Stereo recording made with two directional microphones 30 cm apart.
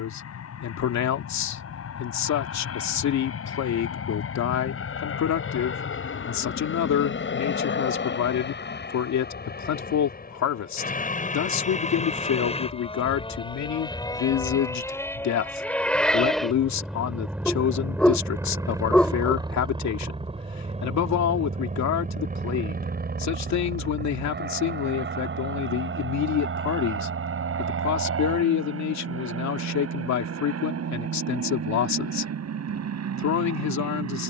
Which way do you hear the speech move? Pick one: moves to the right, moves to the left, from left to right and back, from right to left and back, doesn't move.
doesn't move.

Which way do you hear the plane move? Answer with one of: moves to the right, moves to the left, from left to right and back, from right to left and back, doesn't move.
moves to the right.